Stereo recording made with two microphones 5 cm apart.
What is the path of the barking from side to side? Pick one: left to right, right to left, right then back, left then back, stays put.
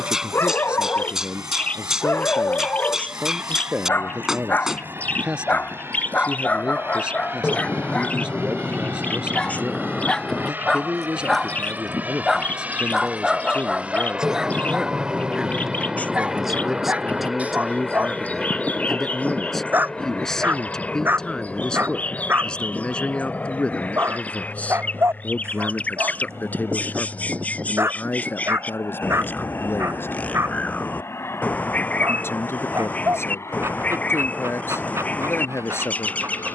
left to right.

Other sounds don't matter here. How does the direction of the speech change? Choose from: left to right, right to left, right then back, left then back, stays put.
right to left.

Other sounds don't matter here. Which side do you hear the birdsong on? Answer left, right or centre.
left.